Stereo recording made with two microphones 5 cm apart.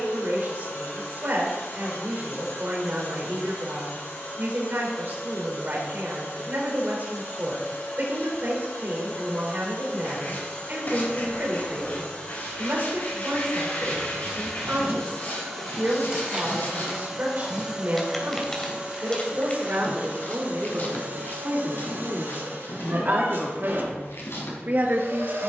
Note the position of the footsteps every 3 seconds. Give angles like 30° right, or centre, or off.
off, off, off, off, 30° right, 20° right, 20° left, 50° left, 70° left.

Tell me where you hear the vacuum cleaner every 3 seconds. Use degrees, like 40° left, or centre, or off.
60° left, 50° left, 50° left, 40° left, 20° left, centre, 30° right, 50° right, 60° right.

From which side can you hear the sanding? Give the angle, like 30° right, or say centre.
50° left.